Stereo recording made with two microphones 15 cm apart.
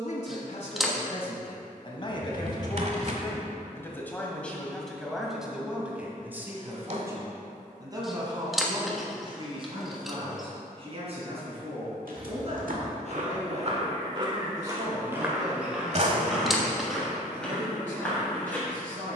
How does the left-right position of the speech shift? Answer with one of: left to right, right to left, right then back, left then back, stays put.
left to right.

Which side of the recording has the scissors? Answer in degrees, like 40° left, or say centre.
centre.